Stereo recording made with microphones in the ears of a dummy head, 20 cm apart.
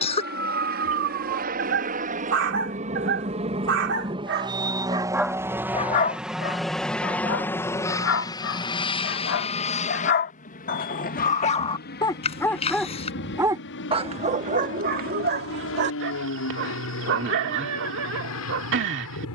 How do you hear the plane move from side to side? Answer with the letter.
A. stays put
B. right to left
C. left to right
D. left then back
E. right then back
B.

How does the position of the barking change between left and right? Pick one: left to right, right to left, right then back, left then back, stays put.
left then back.